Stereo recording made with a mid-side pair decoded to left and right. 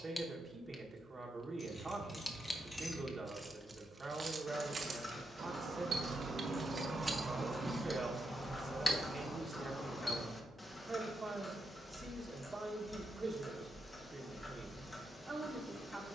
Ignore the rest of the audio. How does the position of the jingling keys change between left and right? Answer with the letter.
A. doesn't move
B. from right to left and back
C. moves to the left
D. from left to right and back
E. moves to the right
D.